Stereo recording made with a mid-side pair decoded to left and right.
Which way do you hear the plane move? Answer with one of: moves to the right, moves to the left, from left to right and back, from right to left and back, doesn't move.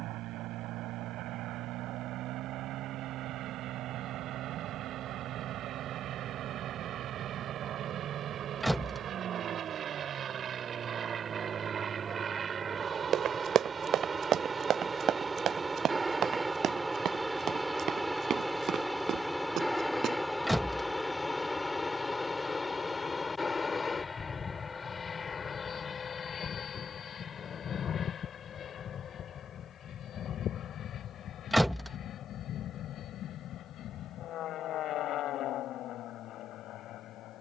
moves to the left.